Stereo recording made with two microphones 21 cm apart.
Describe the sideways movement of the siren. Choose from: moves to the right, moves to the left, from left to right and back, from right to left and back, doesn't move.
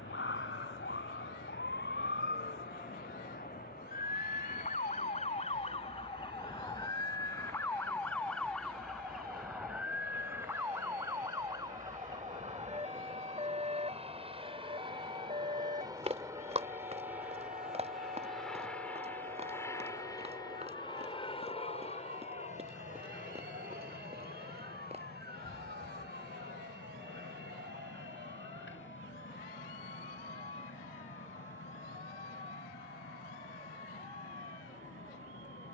moves to the right.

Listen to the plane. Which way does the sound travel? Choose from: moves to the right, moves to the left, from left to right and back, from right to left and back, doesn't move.
moves to the left.